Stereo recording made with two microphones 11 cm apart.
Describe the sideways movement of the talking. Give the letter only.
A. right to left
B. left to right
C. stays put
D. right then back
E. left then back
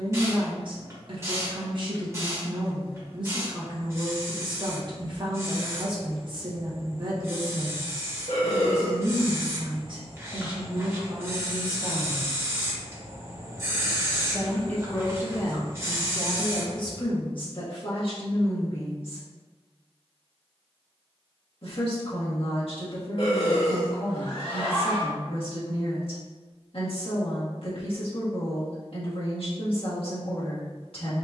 A.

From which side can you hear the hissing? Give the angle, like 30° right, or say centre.
30° right.